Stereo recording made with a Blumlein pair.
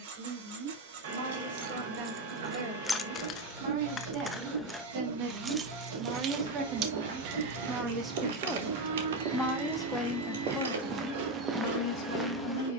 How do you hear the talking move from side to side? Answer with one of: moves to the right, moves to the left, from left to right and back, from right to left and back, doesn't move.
moves to the left.